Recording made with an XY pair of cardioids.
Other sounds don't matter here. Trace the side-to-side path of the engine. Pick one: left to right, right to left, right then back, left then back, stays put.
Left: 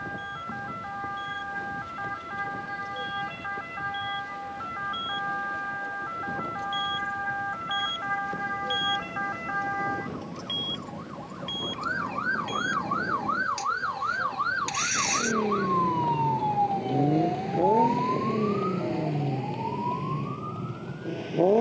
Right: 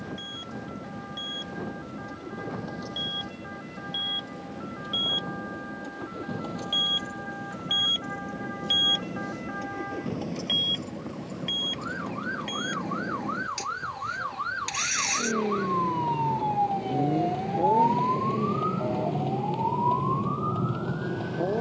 right to left.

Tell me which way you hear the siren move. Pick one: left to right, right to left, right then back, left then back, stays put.
left to right.